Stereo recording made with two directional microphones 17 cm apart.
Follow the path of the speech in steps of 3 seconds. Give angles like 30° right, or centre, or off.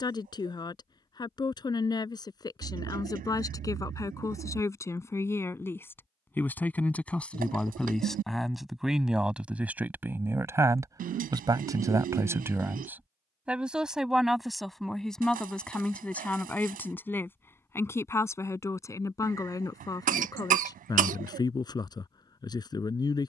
20° left, 20° left, centre, 10° right, 10° right, 10° left, 20° left, 20° left.